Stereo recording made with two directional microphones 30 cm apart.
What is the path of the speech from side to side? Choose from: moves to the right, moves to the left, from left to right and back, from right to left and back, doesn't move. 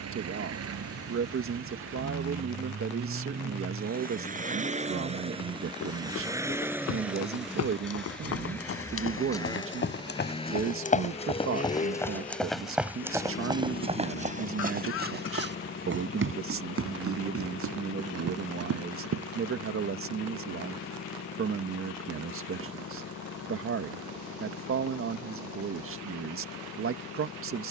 doesn't move.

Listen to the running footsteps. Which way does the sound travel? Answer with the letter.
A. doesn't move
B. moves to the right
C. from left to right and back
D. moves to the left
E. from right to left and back
B.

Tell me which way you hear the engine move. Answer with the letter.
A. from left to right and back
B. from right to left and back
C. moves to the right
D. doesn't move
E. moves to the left
E.